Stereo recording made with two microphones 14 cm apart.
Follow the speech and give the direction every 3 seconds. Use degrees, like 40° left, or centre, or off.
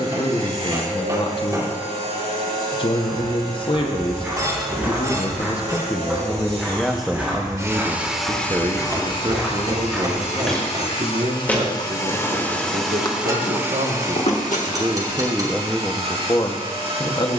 40° left, 30° left, 10° right, 50° right, 60° right, 10° left.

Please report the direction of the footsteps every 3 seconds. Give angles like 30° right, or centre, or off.
off, 10° right, 10° right, centre, 40° left, off.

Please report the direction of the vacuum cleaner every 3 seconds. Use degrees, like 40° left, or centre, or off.
50° right, 50° right, 20° right, 50° left, 10° right, 50° right.